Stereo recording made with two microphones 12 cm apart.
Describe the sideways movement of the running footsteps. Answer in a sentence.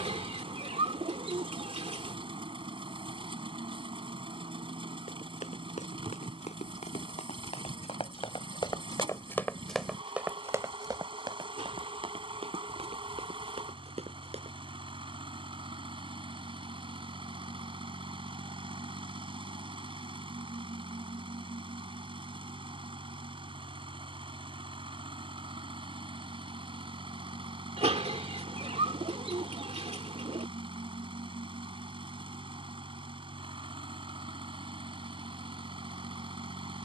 You can hear the running footsteps travel towards the right.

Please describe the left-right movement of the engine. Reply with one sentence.
In this clip you hear the engine stay put.